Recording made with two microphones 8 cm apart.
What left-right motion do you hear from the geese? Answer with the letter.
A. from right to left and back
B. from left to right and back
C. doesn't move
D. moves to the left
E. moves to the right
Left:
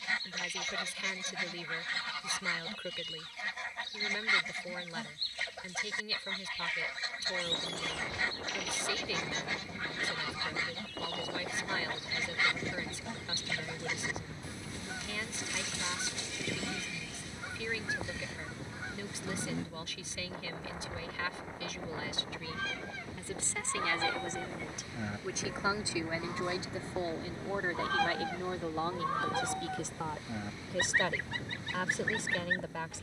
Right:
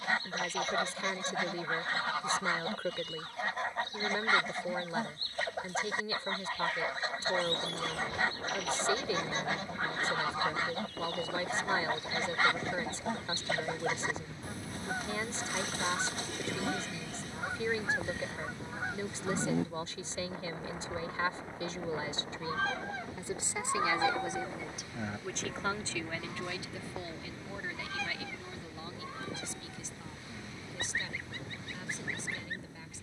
D.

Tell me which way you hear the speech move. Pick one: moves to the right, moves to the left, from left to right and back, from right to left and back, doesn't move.
moves to the left.